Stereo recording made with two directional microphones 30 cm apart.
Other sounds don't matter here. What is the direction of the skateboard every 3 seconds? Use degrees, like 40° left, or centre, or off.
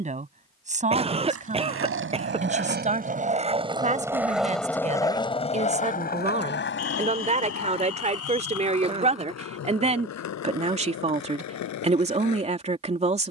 40° right, centre, 50° left, 60° left, 70° left.